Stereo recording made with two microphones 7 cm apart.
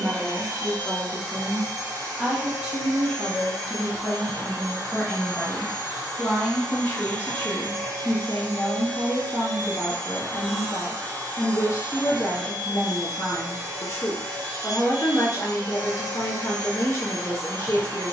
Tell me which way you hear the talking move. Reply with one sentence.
In this clip you hear the talking travel towards the left.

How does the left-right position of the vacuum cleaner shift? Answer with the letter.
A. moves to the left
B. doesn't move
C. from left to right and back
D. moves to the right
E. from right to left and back
B.